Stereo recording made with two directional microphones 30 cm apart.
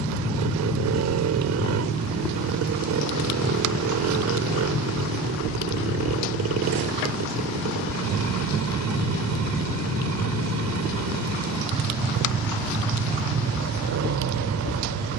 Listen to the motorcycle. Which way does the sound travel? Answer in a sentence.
In this clip you hear the motorcycle stay put.